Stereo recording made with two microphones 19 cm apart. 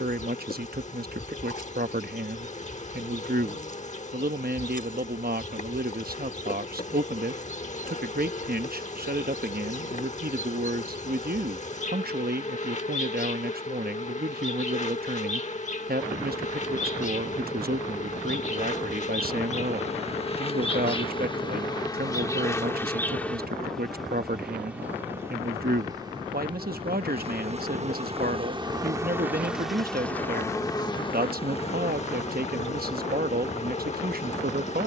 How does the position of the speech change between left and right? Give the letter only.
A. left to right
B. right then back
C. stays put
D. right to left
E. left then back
C.